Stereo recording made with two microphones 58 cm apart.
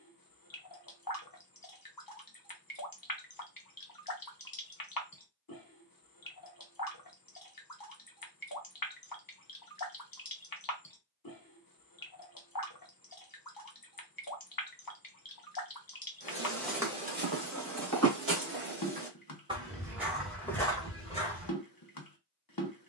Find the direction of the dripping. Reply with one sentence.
You can hear the dripping on the left.